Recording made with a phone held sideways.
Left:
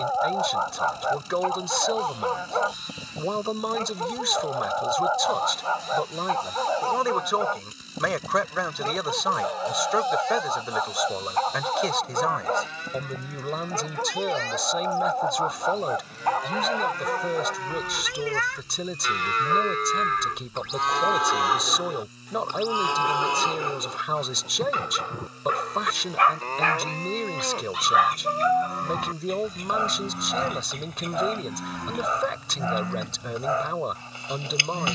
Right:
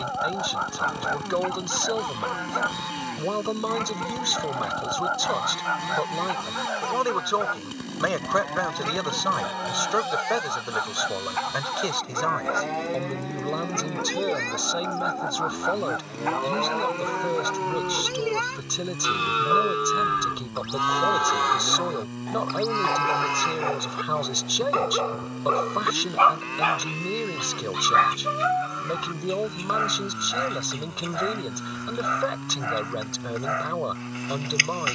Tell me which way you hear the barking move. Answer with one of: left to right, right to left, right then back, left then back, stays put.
right then back.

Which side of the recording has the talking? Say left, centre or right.
centre.